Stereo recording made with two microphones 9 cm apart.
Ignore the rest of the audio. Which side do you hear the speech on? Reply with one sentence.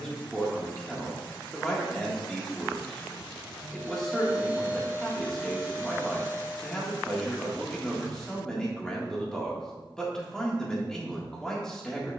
In this clip you hear the speech in the centre.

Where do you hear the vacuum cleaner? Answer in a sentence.
You can hear the vacuum cleaner on the right.